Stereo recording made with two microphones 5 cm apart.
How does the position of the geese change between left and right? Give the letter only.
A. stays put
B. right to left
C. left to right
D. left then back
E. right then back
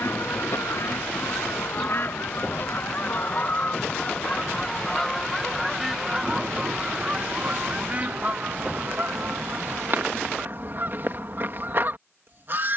C.